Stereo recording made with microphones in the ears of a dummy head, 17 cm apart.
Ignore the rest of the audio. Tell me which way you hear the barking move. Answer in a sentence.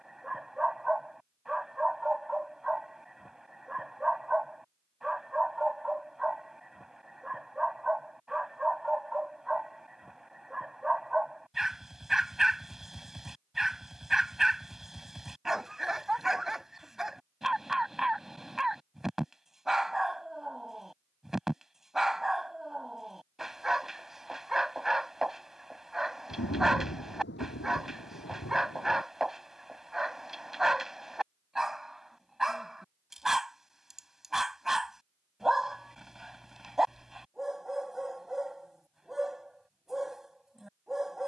You can hear the barking stay in one place.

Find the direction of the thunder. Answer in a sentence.
You can hear the thunder on the left.